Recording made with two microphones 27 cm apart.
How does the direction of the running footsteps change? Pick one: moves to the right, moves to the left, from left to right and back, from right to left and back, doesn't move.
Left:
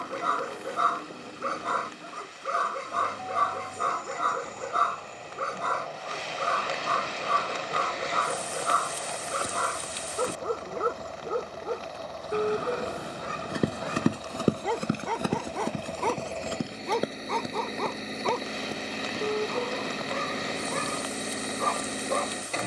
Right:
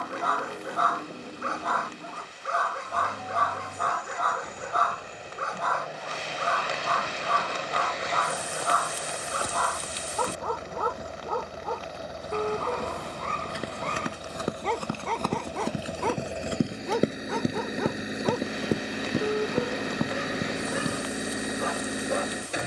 moves to the right.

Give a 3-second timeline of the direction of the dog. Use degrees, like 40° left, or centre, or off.
30° left, 30° left, 30° left, 20° left, 10° left, centre, 10° right, 10° right.